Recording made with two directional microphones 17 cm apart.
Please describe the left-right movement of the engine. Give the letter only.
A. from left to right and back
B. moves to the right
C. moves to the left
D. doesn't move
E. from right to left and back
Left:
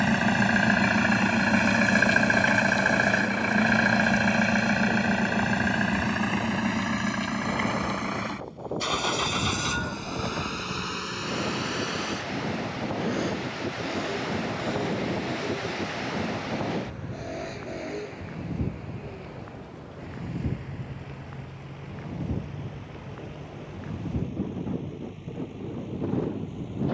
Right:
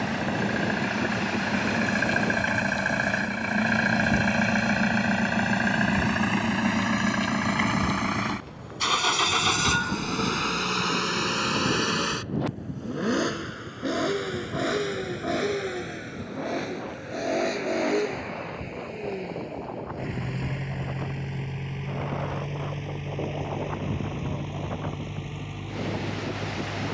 B.